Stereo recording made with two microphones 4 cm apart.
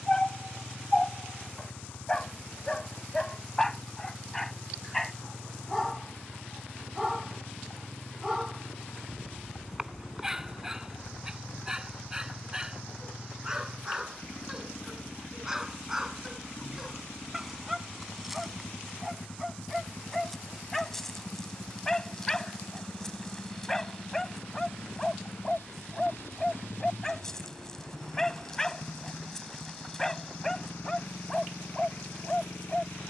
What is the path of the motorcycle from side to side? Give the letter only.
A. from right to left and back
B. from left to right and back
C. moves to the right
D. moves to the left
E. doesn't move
E.